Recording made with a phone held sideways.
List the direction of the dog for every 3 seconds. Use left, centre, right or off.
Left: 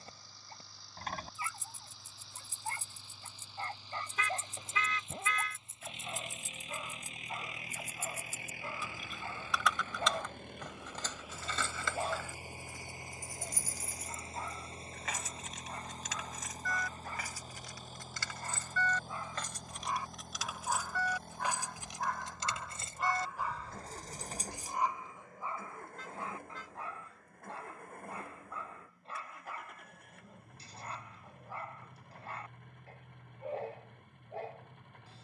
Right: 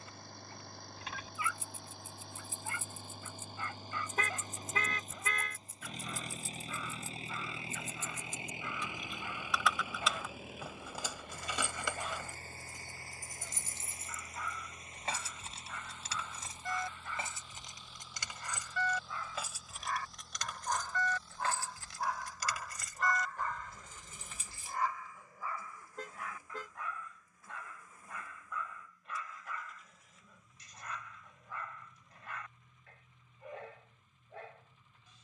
left, left, left, left, left, left, left, centre, left, left, left, left.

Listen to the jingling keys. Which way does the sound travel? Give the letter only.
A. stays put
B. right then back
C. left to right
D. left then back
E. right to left
B.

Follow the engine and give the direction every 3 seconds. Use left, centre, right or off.
right, right, right, centre, left, left, left, left, left, left, left, left.